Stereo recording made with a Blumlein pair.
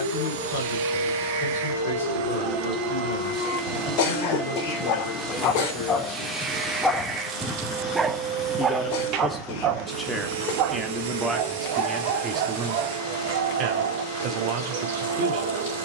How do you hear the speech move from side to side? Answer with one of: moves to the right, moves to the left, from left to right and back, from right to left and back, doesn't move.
moves to the right.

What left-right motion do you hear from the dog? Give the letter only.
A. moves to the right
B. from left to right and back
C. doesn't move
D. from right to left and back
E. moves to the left
A.